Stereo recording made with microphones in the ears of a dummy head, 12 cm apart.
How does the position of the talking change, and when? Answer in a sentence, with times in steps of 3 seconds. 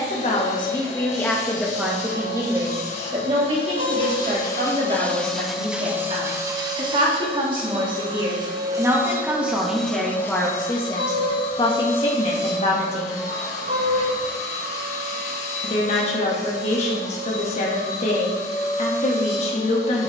In this clip you hear the talking in the centre from 0 s, on the right from 3 s, in the centre from 9 s and on the left from 12 s.